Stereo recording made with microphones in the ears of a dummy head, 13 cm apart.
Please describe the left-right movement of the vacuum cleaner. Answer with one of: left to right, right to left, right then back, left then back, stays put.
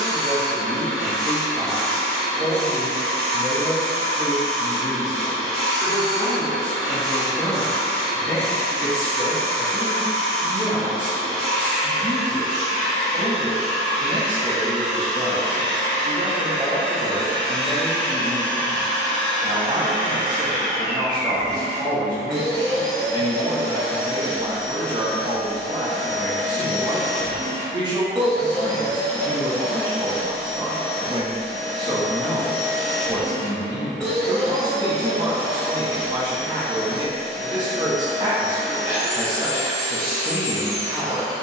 stays put.